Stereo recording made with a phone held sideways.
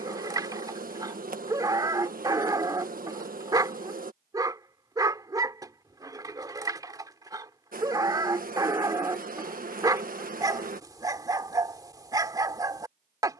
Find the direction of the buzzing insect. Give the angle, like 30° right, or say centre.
60° right.